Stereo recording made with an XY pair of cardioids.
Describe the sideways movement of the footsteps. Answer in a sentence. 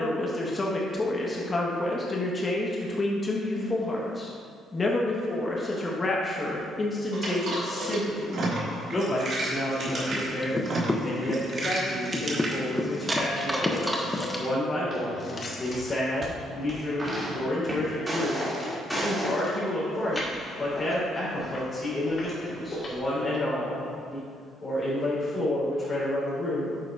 In this clip you hear the footsteps move from right to left.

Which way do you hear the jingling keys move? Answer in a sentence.
You can hear the jingling keys move from right to left.